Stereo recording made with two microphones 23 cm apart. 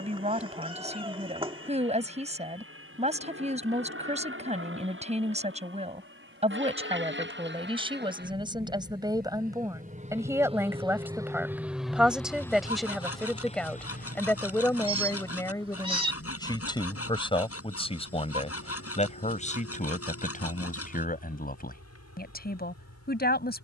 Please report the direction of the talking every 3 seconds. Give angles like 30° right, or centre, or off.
30° right, 30° right, 20° right, 10° right, centre, 20° left, 30° left, 40° left.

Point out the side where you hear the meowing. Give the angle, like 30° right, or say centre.
20° right.